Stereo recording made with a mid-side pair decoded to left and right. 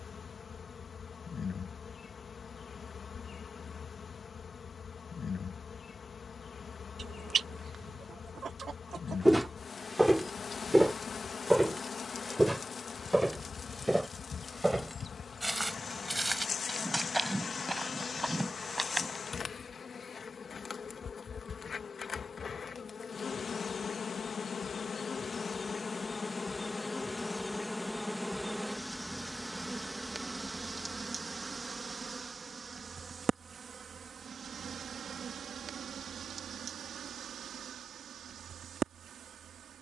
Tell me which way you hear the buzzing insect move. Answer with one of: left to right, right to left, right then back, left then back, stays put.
left to right.